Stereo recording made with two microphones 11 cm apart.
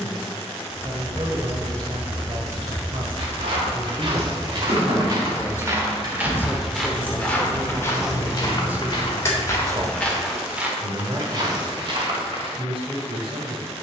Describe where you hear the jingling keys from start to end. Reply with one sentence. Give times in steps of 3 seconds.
In this clip you hear the jingling keys in the centre from 0 s, on the right from 3 s, in the centre from 6 s, on the left from 9 s and not at all from 12 s.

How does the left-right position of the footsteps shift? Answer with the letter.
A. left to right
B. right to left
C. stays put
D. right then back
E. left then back
E.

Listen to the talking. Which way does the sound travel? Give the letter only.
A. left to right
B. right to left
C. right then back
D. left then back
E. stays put
D.